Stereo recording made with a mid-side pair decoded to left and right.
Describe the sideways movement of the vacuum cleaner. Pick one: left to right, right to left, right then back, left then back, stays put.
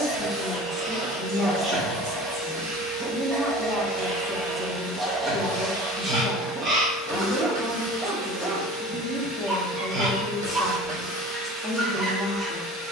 stays put.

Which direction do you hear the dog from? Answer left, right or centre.
right.